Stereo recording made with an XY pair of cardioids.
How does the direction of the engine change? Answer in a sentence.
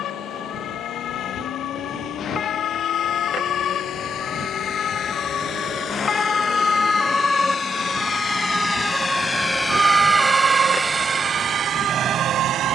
In this clip you hear the engine go from the left side to the right.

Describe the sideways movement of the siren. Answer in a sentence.
In this clip you hear the siren travel towards the right.